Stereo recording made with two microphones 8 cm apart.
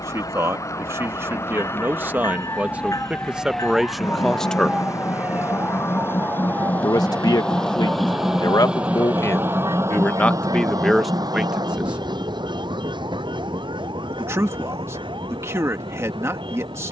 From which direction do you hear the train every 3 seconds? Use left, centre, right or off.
left, left, centre, right, right, right.